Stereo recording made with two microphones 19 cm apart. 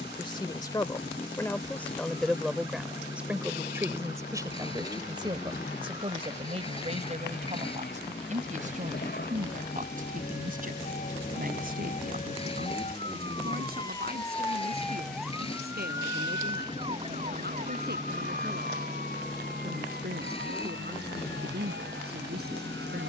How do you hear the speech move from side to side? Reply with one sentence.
You can hear the speech travel towards the right.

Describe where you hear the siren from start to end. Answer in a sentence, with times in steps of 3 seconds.
You can hear the siren on the left from 0 s and on the right from 15 s.